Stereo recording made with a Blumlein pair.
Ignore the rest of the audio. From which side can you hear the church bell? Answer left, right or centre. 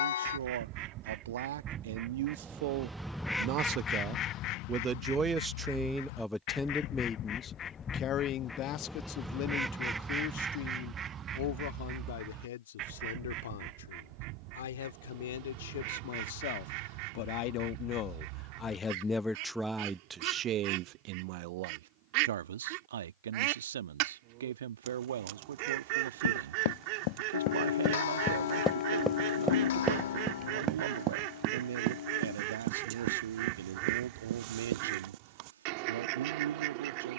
left.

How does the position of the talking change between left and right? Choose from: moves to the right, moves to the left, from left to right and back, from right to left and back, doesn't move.
from right to left and back.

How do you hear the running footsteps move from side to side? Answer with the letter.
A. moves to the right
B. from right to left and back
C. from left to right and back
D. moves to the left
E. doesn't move
A.